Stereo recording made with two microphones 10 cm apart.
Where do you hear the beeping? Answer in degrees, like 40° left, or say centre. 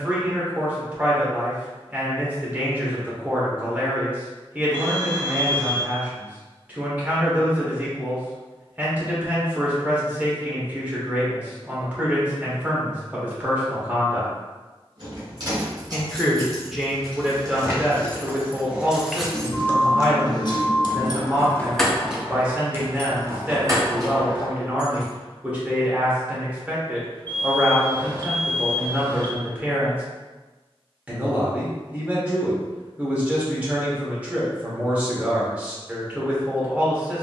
20° left.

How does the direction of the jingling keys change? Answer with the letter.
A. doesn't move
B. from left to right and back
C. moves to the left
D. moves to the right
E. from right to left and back
E.